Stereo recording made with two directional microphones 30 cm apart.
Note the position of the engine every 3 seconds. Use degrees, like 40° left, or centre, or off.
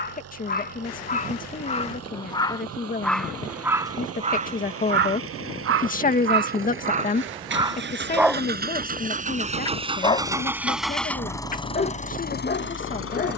60° right, 50° right, 40° right, 10° right, 40° left.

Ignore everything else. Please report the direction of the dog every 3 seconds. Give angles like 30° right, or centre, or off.
20° left, 20° right, 20° right, 20° left, 30° left.